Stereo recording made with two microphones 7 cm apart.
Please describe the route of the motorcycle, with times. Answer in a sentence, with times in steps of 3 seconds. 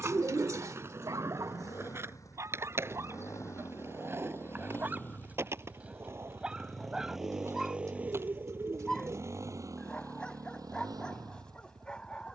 In this clip you hear the motorcycle on the left from 0 s, in the centre from 6 s and on the right from 9 s.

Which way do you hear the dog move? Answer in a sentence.
You can hear the dog go from the right side to the left.